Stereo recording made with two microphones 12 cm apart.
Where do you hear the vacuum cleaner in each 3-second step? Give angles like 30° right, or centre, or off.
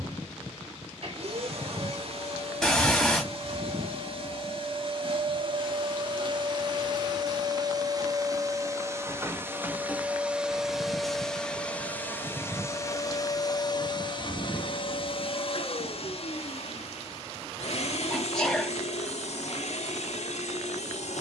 60° right, 50° right, 40° right, 10° right, 30° left, 60° left, 70° left.